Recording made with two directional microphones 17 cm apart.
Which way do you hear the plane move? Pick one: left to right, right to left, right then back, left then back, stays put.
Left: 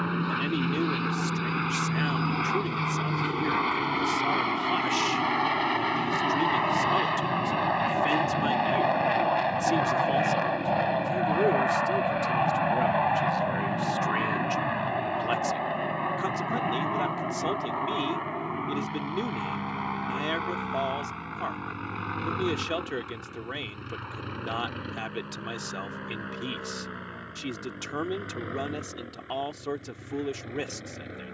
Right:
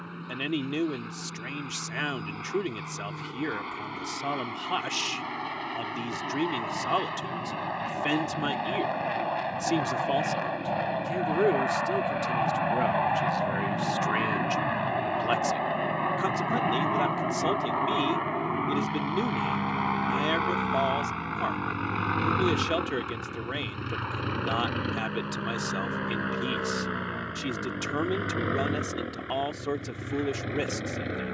left to right.